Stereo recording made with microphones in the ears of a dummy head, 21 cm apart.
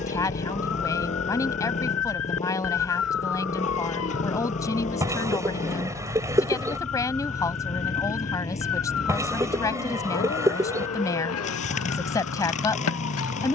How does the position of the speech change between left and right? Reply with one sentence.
In this clip you hear the speech stay in one place.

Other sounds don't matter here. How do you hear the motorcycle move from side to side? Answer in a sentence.
You can hear the motorcycle stay put.